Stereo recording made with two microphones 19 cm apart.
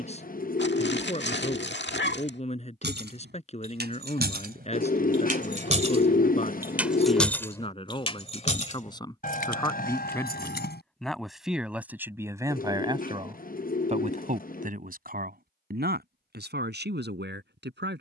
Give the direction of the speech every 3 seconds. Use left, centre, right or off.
left, left, left, centre, right, right.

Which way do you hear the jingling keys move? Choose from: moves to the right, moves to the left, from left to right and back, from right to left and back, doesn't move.
moves to the left.